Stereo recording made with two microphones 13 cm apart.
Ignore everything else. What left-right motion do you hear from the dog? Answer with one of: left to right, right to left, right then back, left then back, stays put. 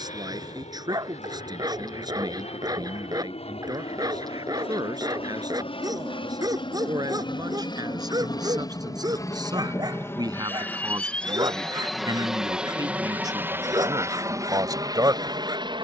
stays put.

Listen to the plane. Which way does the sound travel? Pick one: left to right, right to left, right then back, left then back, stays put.
left to right.